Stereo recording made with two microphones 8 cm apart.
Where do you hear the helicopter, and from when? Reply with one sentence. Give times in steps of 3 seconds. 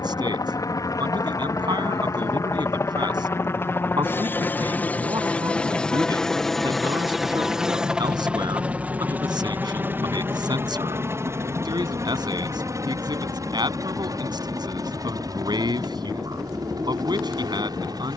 In this clip you hear the helicopter on the left from 0 s, in the centre from 6 s and on the right from 9 s.